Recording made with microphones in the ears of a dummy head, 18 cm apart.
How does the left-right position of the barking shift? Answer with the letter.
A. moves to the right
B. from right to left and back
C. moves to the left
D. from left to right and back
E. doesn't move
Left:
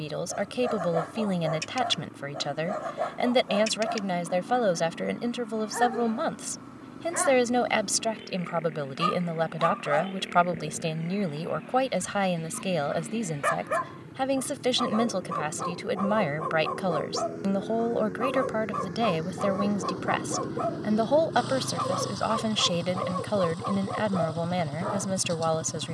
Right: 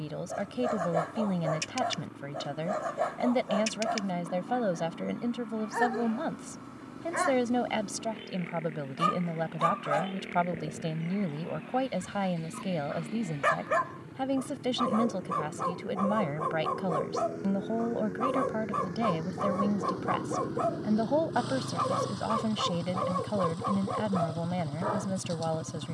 E.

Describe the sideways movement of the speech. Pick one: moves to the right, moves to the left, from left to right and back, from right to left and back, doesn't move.
doesn't move.